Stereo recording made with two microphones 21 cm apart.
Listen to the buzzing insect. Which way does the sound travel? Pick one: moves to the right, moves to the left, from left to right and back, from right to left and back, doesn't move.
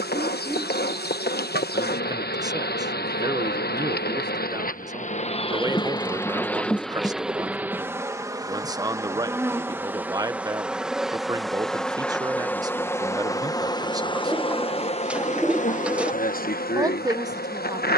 from left to right and back.